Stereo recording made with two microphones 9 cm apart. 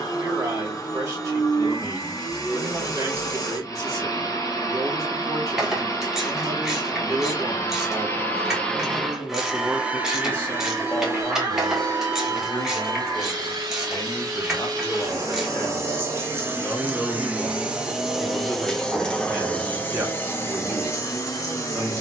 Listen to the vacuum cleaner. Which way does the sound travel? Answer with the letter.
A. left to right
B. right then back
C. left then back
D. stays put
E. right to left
B.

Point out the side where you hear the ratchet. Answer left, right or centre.
centre.